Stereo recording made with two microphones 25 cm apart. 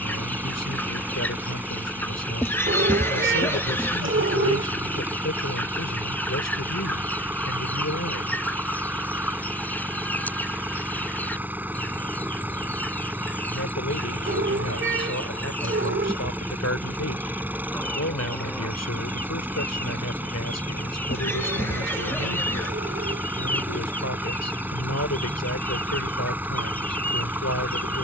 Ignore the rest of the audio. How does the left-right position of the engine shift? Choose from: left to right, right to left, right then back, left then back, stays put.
stays put.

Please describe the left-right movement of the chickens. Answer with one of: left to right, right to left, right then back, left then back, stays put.
stays put.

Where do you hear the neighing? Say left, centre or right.
centre.